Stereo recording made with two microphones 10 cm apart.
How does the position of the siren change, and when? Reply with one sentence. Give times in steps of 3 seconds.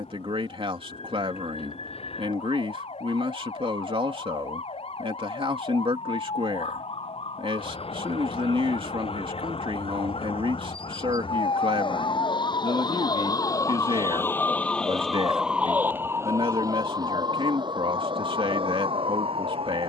In this clip you hear the siren on the left from 0 s and on the right from 15 s.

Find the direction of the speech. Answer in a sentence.
You can hear the speech on the right.